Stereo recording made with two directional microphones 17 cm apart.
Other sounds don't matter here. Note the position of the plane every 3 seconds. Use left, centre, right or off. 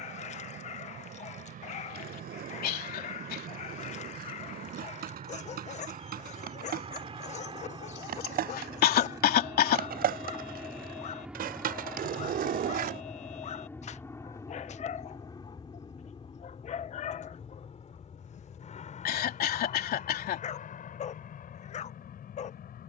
right, right, right, centre, centre, left, left, left.